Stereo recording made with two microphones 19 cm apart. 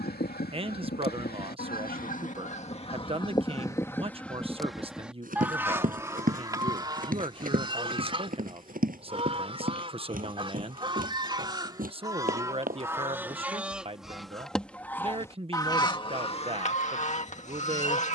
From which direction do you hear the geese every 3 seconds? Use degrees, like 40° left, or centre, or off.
50° left, 10° left, 30° right, 30° right, 10° right, 30° left.